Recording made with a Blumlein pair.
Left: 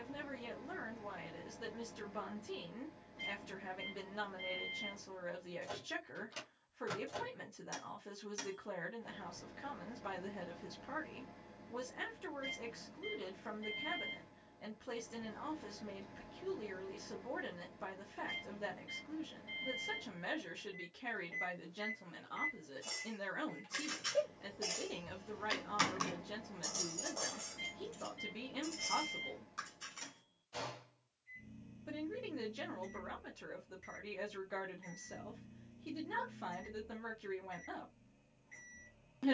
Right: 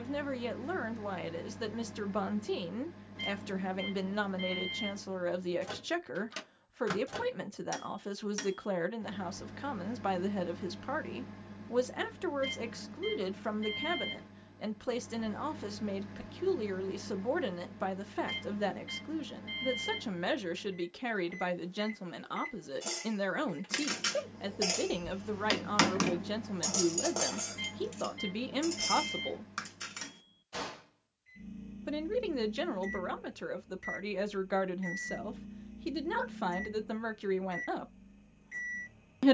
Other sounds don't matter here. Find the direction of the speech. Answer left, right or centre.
right.